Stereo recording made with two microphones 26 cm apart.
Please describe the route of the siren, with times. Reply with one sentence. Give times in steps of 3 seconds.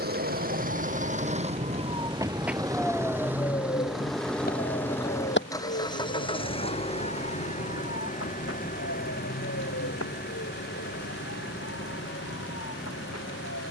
In this clip you hear the siren on the right from 0 s and on the left from 3 s.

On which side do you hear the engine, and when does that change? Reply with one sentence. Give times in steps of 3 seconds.
In this clip you hear the engine on the right from 0 s, in the centre from 3 s and on the left from 6 s.